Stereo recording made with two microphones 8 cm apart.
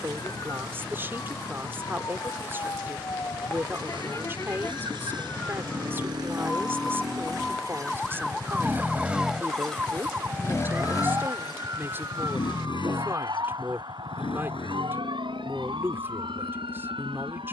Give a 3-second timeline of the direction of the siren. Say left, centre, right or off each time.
left, left, centre, right, right, right.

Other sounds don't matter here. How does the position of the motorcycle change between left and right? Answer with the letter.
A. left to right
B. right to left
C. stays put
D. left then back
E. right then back
B.